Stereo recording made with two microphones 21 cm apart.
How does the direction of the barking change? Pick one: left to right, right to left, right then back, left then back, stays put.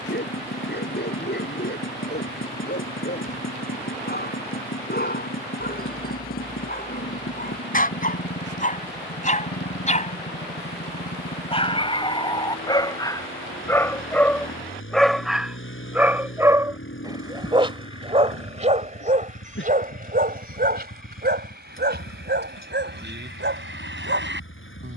left to right.